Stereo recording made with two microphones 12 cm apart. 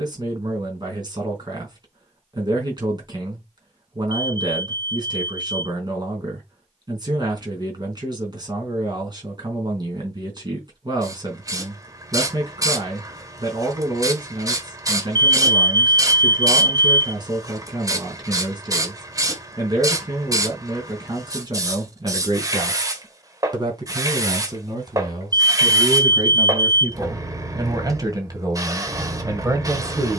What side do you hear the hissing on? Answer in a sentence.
You can hear the hissing on the right.